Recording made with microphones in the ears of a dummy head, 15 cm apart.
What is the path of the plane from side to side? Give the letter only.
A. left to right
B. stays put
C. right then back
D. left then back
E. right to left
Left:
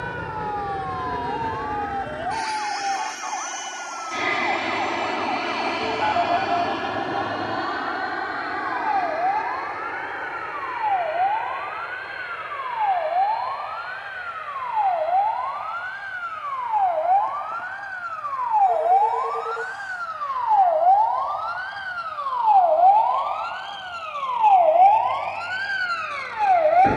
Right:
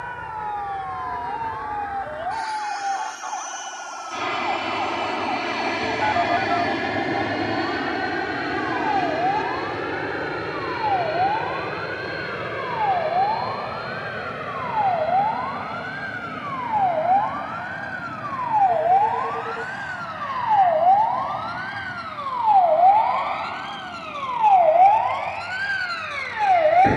A.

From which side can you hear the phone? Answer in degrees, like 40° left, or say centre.
10° left.